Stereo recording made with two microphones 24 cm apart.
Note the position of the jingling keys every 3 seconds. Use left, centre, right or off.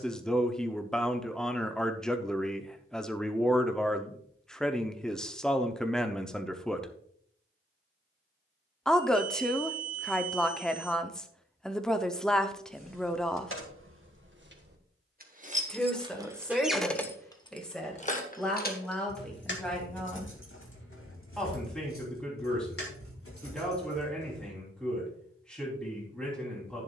off, off, off, off, right, centre, left, left, left.